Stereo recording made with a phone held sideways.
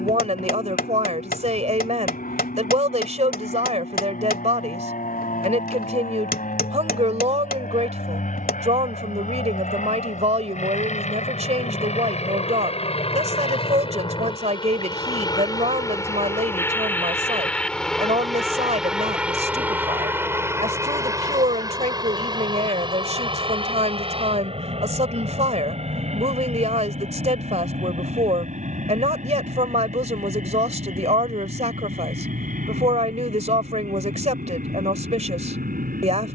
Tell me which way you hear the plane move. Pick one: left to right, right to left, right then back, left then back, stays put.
left to right.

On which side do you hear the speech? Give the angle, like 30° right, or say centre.
50° right.